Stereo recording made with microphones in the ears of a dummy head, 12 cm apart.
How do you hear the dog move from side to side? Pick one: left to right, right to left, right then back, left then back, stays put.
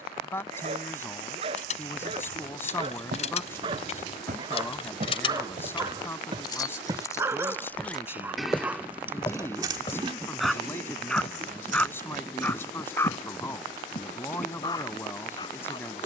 right to left.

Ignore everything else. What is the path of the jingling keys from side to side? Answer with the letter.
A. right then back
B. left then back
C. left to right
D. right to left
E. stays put
C.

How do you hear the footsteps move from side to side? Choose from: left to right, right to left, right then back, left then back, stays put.
right to left.